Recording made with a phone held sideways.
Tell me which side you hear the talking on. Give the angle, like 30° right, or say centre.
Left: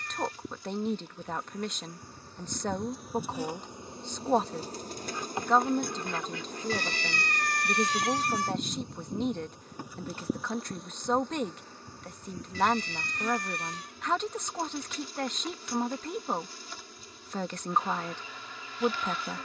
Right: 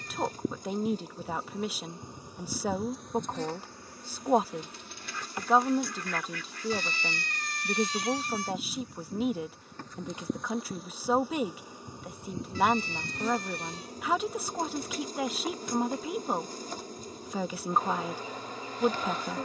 10° right.